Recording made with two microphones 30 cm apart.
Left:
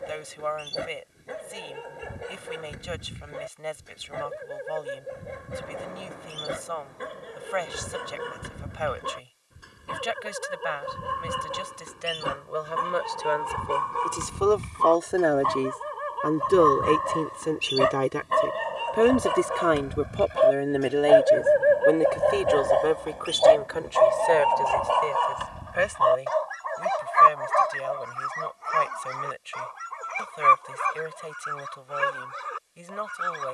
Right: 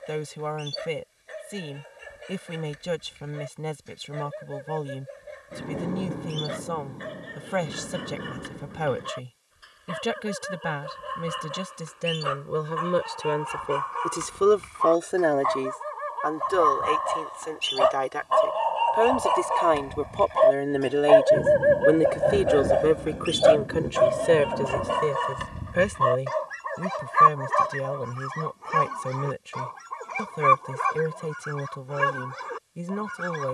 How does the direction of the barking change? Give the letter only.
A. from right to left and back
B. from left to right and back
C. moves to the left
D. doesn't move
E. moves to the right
E.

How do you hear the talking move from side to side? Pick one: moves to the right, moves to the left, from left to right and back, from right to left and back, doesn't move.
from right to left and back.